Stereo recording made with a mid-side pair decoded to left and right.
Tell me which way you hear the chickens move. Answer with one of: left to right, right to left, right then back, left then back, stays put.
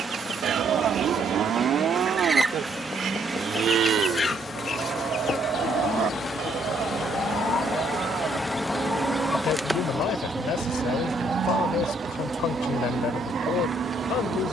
left then back.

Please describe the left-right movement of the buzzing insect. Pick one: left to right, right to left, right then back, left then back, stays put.
left to right.